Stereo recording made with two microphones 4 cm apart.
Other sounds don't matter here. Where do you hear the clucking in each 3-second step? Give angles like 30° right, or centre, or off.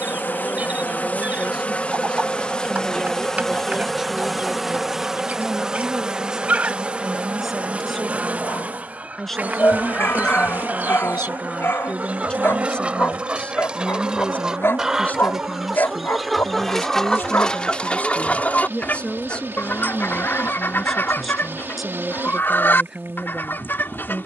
30° right, 30° right, 30° right, 30° right, 20° right, centre, 40° left, 50° left.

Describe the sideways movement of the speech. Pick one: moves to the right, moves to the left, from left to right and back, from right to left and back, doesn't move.
from right to left and back.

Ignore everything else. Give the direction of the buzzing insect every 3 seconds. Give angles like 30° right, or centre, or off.
30° left, centre, 30° right, 40° right, 50° right, 60° right, 60° right, 60° right.